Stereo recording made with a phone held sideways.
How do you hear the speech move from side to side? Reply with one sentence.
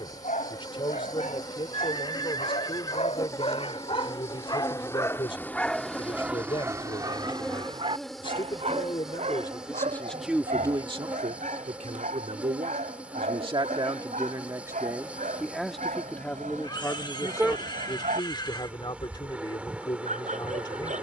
In this clip you hear the speech go right and come back.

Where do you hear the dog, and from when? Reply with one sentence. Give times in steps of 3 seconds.
In this clip you hear the dog on the left from 0 s and on the right from 6 s.